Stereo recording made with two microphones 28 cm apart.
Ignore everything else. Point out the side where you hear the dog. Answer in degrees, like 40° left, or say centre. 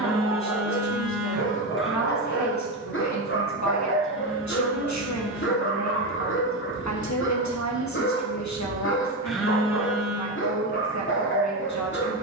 40° left.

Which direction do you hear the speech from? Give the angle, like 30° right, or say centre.
70° left.